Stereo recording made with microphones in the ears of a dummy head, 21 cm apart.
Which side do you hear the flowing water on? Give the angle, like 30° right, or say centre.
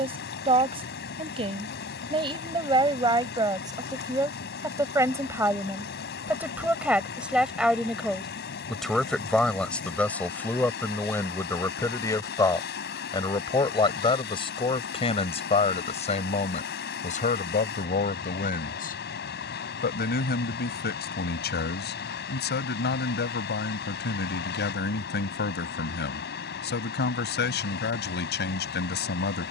40° left.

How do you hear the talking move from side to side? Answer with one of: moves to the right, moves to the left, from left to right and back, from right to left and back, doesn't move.
moves to the left.